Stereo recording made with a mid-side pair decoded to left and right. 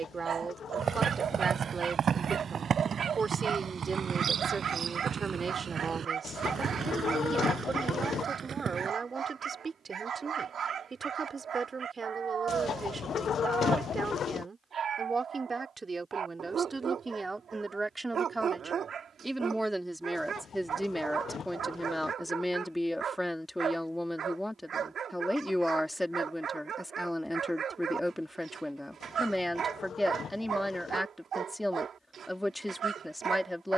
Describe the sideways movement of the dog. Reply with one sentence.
In this clip you hear the dog stay put.